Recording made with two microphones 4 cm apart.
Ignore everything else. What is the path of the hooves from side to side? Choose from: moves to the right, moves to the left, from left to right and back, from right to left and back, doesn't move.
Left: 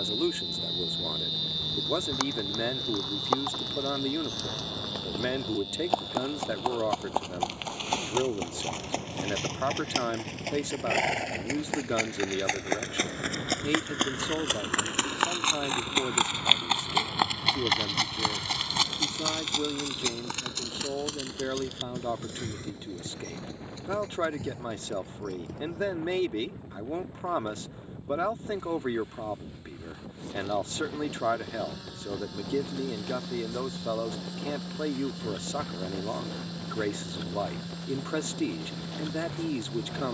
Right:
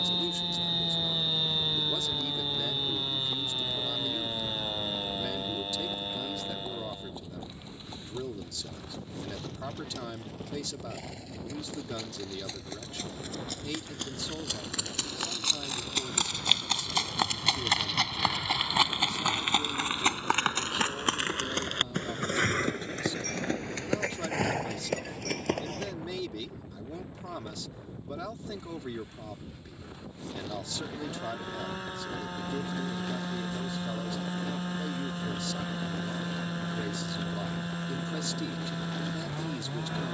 moves to the right.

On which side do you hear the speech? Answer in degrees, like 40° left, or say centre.
40° left.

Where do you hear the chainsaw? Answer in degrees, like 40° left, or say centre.
40° right.